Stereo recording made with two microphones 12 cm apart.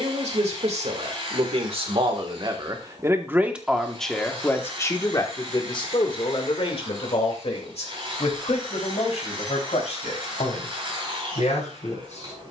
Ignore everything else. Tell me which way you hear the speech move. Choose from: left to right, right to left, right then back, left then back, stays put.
right to left.